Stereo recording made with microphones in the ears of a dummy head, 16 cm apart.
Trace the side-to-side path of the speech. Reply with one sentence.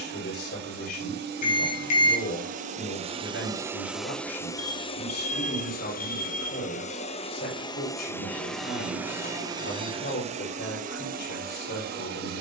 In this clip you hear the speech stay put.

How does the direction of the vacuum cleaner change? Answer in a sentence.
In this clip you hear the vacuum cleaner move from right to left and back again.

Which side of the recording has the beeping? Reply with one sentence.
In this clip you hear the beeping on the left.